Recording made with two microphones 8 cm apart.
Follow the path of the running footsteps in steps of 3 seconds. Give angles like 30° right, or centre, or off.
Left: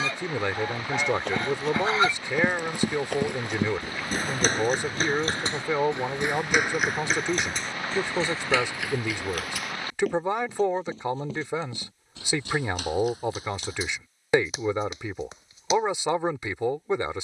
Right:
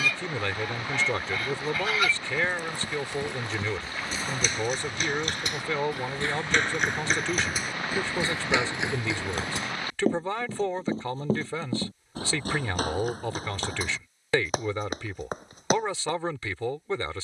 70° left, 50° left, centre, 30° right, 50° right, 50° right.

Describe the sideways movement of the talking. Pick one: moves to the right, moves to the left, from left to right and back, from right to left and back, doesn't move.
doesn't move.